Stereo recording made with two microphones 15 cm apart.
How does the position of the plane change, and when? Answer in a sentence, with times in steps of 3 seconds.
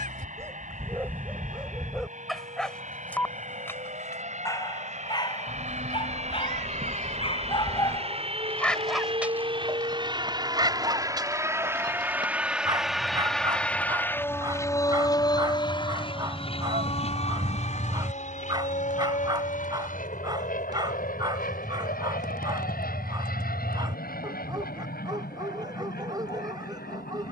You can hear the plane on the right from 0 s, in the centre from 12 s and on the left from 15 s.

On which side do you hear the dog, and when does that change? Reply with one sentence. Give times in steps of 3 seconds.
You can hear the dog in the centre from 0 s, on the left from 3 s and on the right from 9 s.